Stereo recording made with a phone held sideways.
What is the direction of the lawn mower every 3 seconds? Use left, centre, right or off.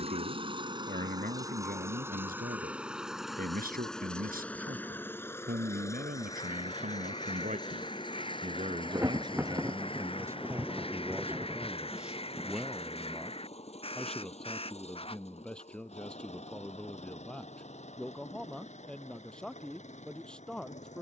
right, centre, left, left, left, left, left.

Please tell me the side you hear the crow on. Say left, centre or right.
left.